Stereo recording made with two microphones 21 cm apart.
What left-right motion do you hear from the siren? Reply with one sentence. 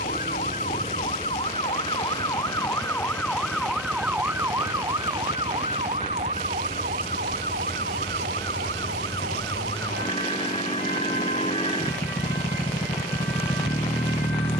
You can hear the siren move to the right.